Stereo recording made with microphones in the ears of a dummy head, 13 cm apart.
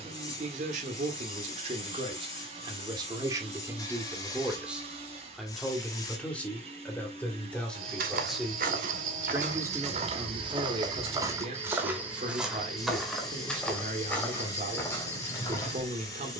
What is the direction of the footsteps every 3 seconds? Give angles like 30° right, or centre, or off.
off, off, 70° right, 40° right, centre, 20° left.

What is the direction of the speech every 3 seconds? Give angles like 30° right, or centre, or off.
50° right, 10° right, 10° left, 30° right, 50° right, 50° right.